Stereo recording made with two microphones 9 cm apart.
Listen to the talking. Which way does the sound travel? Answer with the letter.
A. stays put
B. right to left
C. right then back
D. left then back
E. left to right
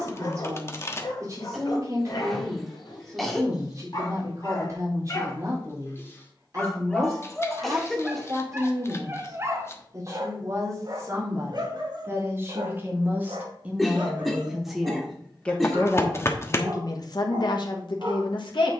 B.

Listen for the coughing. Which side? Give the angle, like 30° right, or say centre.
centre.